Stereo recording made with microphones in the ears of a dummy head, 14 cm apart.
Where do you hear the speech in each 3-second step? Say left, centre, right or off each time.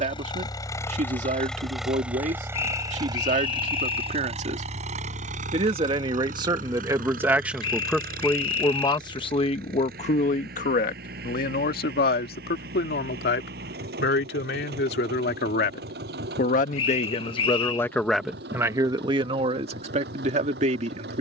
right, right, centre, left, left, left, right.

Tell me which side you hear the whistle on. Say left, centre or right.
left.